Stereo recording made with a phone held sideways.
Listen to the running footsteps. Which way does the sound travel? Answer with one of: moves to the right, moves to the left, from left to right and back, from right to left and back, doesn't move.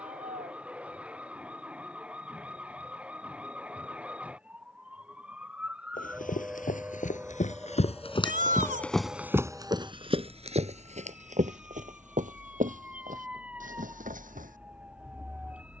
moves to the right.